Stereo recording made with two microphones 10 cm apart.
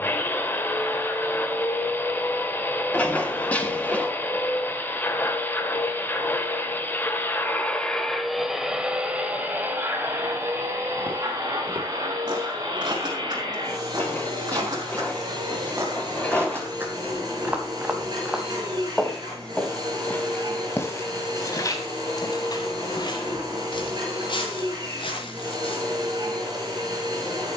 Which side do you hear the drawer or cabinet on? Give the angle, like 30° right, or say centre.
10° left.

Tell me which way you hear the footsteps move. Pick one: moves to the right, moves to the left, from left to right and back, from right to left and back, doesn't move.
moves to the left.